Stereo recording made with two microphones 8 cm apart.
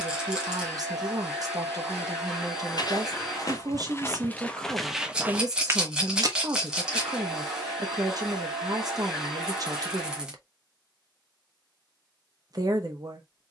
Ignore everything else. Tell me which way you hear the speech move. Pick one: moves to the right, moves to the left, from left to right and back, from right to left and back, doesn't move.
doesn't move.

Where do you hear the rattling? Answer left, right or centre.
centre.